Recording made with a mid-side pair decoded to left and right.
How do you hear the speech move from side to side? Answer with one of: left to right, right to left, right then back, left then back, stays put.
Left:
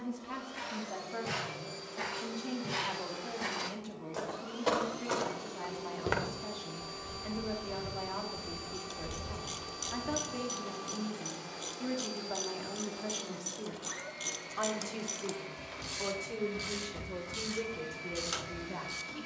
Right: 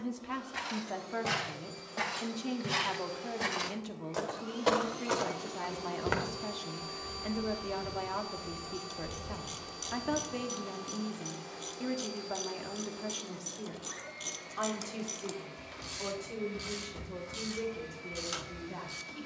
right to left.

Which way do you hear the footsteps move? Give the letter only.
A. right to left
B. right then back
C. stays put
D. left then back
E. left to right
A.